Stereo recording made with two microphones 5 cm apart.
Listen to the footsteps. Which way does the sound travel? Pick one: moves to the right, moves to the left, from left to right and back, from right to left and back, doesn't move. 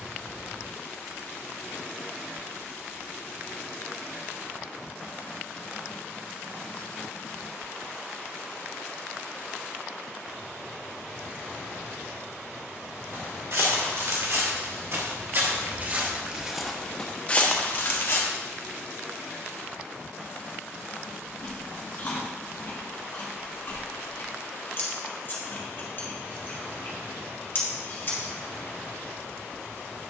moves to the left.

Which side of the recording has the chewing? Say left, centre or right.
left.